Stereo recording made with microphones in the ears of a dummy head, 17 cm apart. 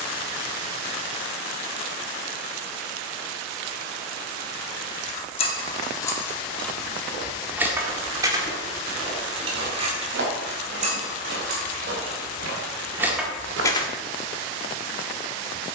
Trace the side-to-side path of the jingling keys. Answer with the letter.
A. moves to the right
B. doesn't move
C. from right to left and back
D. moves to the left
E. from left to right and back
E.